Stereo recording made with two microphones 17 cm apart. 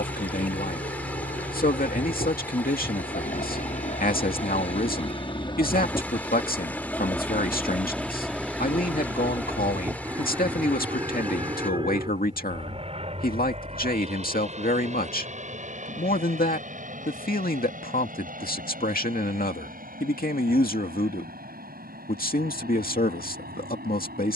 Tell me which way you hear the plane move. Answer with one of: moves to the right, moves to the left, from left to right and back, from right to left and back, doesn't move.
moves to the right.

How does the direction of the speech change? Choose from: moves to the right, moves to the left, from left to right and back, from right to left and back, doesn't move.
doesn't move.